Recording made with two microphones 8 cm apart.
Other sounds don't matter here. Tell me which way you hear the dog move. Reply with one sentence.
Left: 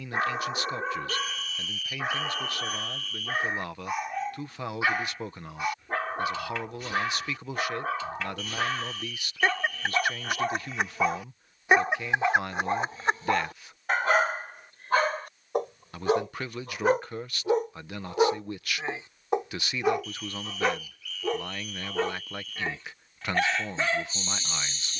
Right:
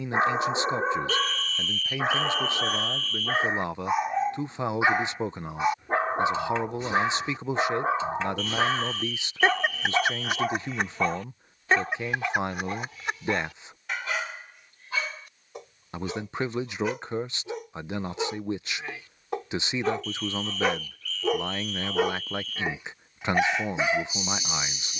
You can hear the dog move from right to left and back again.